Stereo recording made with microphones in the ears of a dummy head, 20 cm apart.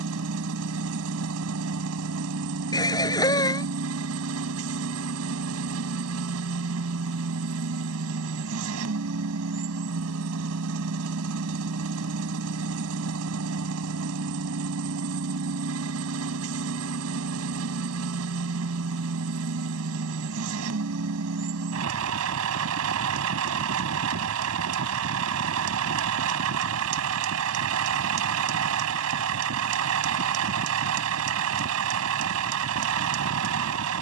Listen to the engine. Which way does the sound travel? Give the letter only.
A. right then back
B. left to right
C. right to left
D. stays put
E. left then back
D.